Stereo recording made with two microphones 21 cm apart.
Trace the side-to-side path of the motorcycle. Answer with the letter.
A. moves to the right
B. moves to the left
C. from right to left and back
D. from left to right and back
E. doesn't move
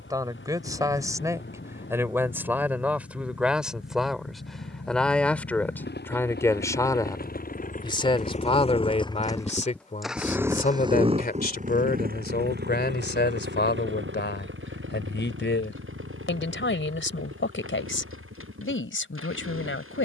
A.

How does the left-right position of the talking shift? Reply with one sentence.
You can hear the talking move from right to left.